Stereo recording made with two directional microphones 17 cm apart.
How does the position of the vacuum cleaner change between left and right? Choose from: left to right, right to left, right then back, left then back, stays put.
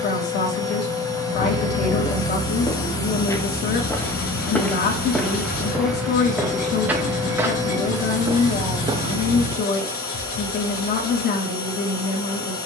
stays put.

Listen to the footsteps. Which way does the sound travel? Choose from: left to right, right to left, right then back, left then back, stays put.
left to right.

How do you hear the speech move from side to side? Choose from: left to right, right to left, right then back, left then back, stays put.
stays put.